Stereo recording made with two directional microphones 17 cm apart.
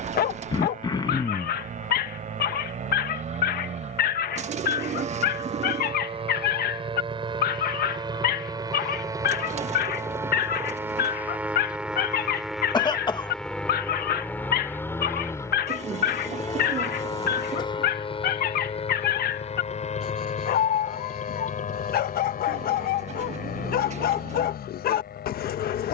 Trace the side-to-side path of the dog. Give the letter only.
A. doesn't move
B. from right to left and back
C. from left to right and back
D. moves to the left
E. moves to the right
A.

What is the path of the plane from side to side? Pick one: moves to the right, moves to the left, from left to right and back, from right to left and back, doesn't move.
moves to the left.